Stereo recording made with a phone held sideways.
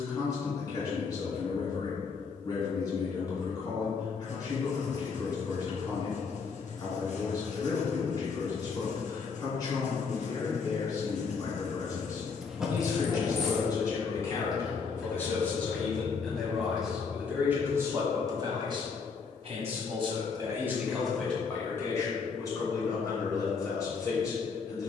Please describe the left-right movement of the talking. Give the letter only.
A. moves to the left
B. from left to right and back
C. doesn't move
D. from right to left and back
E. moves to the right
B.